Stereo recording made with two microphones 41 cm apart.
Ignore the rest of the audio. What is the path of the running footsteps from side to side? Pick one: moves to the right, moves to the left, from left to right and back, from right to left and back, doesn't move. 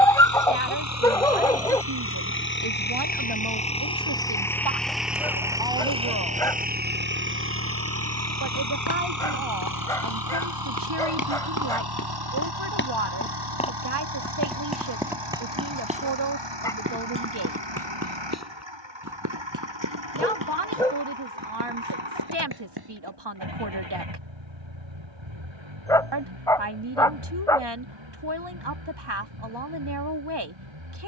moves to the right.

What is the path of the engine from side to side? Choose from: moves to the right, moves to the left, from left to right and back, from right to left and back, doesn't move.
moves to the right.